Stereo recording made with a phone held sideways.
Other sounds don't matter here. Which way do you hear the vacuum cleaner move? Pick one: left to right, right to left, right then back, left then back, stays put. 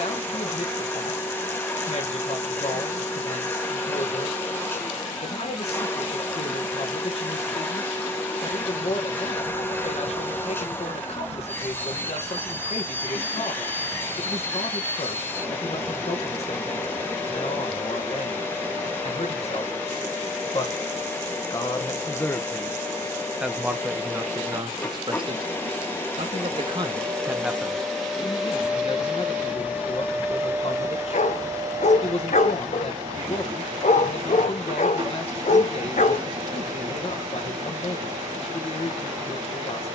left to right.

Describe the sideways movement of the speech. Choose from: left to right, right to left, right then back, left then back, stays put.
right then back.